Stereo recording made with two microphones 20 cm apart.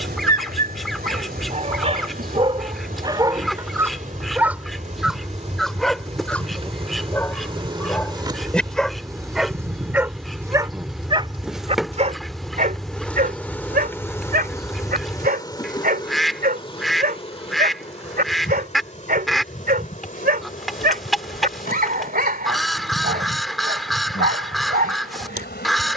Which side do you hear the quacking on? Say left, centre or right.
centre.